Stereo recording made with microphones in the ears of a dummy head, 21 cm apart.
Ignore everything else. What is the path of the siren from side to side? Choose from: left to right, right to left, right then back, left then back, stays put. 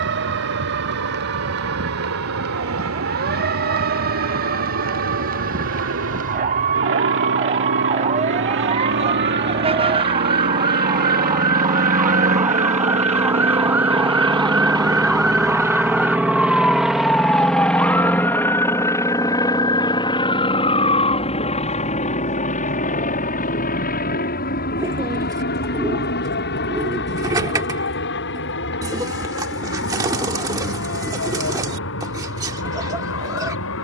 right to left.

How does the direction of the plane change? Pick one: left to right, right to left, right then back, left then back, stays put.
right to left.